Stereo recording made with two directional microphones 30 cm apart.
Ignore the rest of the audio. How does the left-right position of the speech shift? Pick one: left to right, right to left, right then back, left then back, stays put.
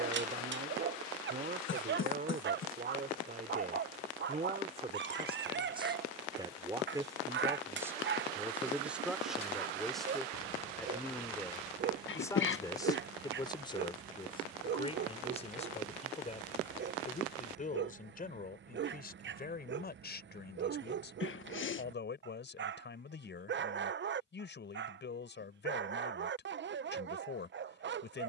right to left.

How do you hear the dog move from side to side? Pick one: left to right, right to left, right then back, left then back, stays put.
stays put.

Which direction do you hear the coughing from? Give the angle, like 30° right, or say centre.
40° left.